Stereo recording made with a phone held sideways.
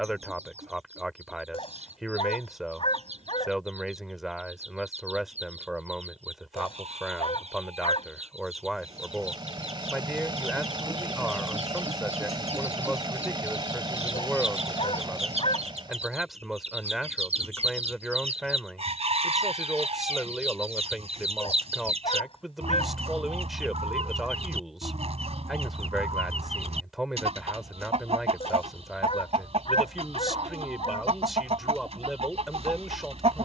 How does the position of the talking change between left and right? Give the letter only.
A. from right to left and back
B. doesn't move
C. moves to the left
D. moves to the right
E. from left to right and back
B.